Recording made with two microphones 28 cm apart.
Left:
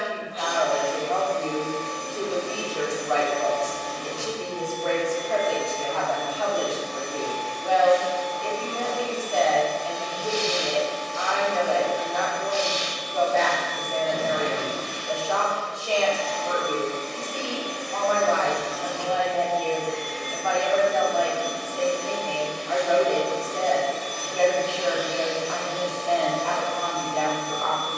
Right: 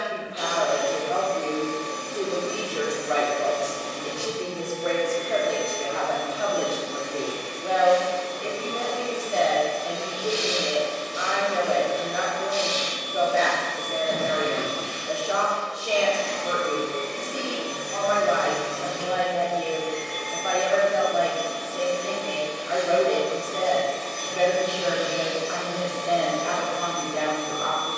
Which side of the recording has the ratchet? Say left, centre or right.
right.